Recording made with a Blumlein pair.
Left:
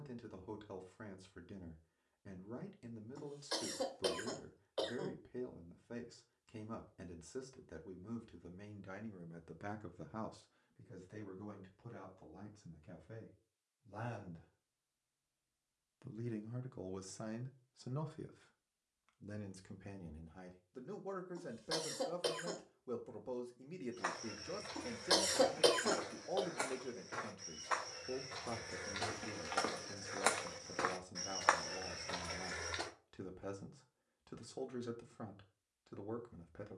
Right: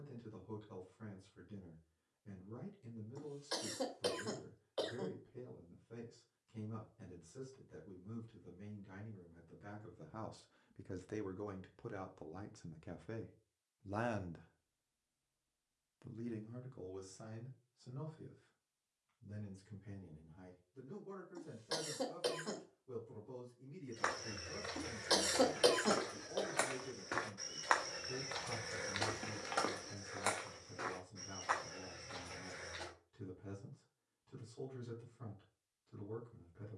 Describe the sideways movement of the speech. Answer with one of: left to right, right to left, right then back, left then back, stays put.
right then back.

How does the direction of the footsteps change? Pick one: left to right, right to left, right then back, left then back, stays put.
right to left.